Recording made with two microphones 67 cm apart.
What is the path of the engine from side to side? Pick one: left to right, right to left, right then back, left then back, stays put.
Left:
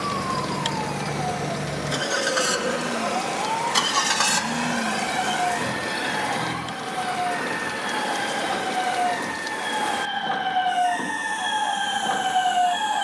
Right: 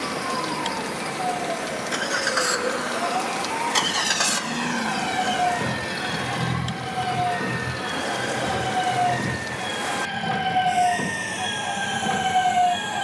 left to right.